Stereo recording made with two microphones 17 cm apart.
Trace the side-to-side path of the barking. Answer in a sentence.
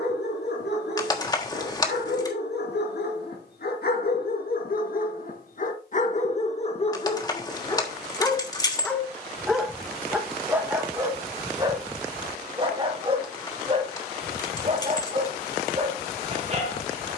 In this clip you hear the barking move to the right.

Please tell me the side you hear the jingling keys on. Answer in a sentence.
You can hear the jingling keys on the left.